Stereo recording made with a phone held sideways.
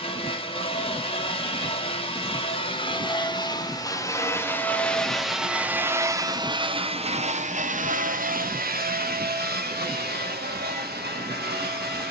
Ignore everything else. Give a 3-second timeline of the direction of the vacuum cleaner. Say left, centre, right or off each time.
left, centre, right, right.